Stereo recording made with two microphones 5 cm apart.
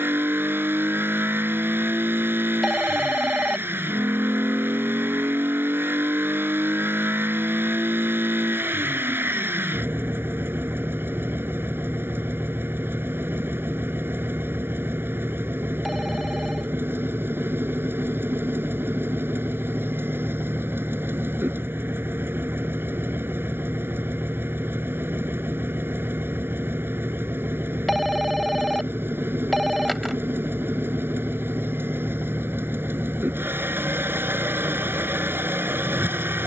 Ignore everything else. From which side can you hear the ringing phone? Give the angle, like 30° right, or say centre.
centre.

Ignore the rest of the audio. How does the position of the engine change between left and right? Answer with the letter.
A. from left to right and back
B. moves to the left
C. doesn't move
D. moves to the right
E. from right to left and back
C.